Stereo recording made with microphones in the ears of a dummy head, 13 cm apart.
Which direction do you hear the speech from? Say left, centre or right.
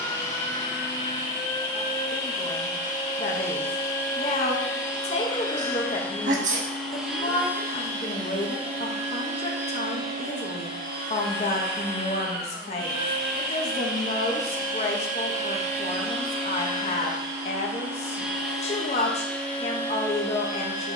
left.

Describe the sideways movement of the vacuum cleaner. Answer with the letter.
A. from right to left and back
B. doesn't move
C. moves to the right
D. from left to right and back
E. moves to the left
D.